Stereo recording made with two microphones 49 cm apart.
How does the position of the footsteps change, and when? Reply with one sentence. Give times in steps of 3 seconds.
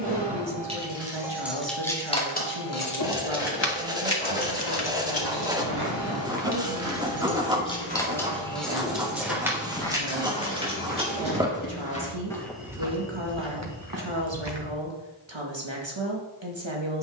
You can hear the footsteps not at all from 0 s, on the right from 3 s, in the centre from 9 s, on the right from 12 s and not at all from 15 s.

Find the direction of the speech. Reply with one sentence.
In this clip you hear the speech on the right.